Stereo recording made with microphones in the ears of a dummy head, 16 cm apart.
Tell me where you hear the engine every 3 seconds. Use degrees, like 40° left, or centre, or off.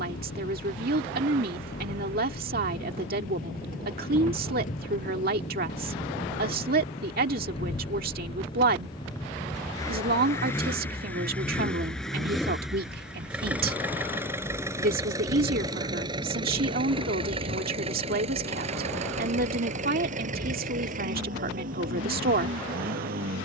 50° left, 40° left, 30° left, 10° left, 10° right, 30° right, 40° right, 50° right.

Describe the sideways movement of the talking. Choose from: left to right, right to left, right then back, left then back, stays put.
stays put.